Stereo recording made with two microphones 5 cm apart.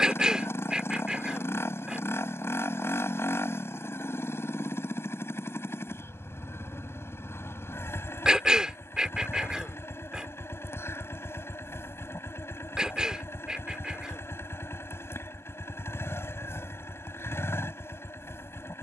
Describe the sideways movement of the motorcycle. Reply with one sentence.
You can hear the motorcycle stay in one place.